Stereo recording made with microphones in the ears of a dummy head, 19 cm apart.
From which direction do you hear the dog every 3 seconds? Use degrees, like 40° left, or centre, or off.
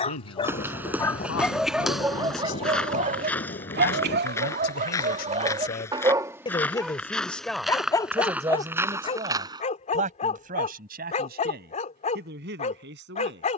centre, 40° right, 10° left, 30° left, 40° left.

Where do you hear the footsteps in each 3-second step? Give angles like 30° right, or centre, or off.
centre, 10° left, centre, 20° right, off.